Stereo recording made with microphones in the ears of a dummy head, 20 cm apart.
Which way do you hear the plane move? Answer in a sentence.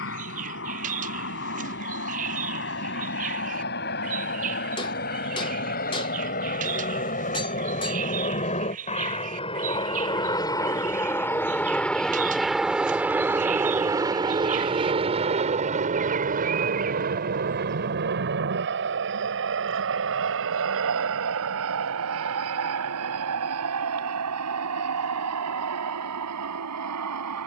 In this clip you hear the plane move from left to right.